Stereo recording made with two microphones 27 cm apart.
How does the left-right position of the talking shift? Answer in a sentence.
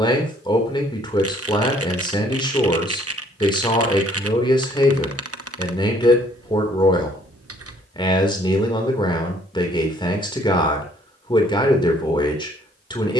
You can hear the talking stay in one place.